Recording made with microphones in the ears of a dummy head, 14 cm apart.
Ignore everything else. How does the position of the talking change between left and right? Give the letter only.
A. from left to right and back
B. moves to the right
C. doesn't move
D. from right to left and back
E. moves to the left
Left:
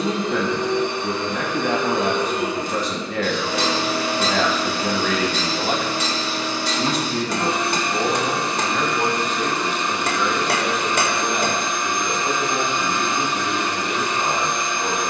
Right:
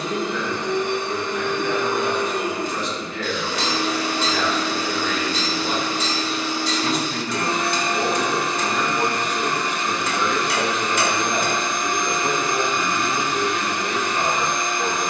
B.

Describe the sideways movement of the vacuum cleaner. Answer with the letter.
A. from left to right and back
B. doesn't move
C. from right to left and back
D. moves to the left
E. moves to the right
B.